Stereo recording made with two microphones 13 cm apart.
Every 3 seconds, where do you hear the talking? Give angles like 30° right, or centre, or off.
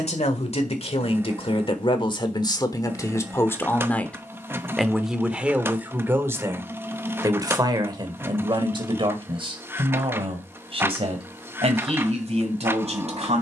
40° left, centre, 30° right, 50° right, 50° right.